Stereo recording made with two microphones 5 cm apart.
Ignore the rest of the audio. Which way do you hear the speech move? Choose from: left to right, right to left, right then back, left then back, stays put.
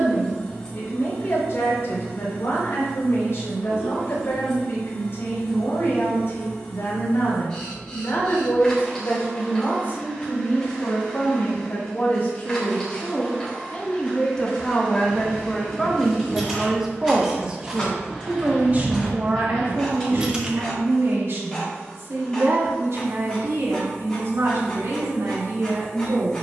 left to right.